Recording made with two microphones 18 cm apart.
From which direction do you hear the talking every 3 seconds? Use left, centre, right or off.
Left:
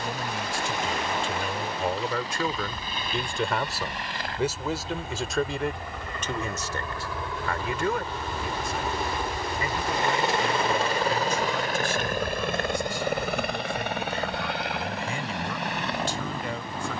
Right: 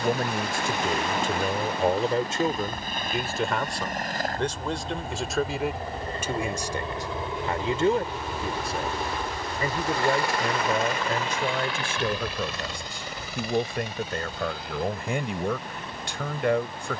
right, centre, right, right, right, right.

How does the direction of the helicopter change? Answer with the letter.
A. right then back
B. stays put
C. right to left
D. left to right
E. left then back
C.